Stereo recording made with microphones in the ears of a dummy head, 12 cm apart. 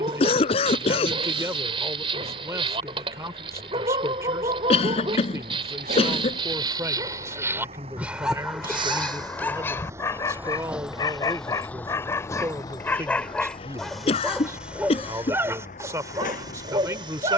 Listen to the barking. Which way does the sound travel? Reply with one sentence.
You can hear the barking go left and come back.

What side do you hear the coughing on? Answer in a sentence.
You can hear the coughing on the left.